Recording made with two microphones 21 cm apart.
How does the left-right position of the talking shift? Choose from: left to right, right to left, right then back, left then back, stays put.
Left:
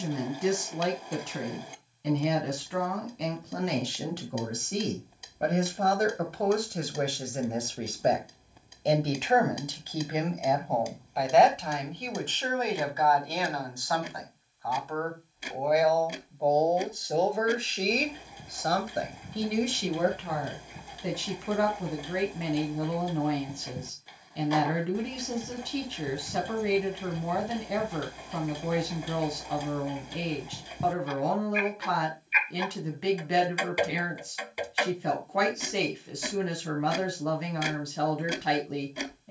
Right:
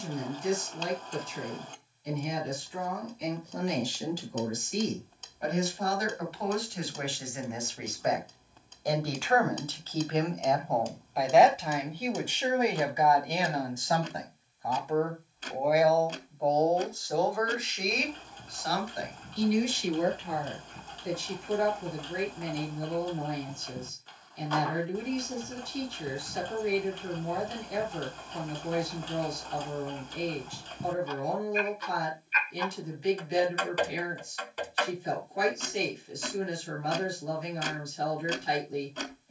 right then back.